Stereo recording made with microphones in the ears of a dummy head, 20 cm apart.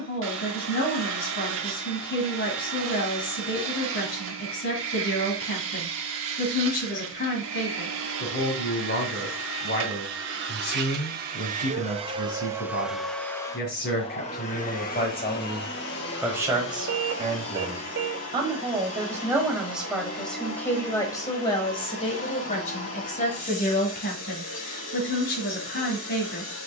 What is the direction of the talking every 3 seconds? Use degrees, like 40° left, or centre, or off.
50° left, 50° left, 50° left, 50° left, 50° left, 10° right, 10° right, 30° left, 50° left.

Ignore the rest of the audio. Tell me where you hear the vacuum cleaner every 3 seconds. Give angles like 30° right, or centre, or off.
60° right, 60° right, 60° right, 50° right, 10° left, 50° left, 60° left, 60° left, 60° left.